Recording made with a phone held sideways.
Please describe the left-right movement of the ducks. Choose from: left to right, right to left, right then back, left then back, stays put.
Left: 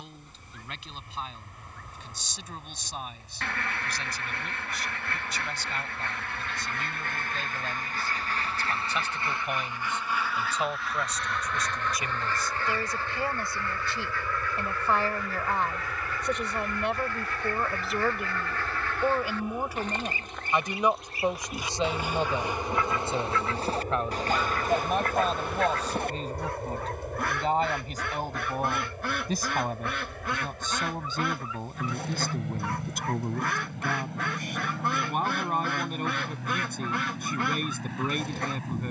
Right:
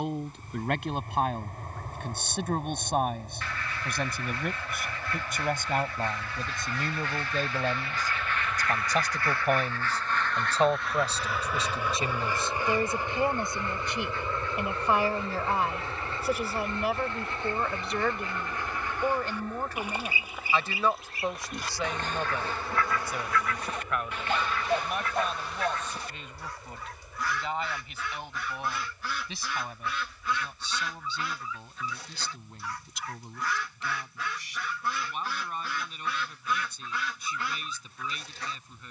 right then back.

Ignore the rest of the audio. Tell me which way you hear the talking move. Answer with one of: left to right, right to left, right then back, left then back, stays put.
right to left.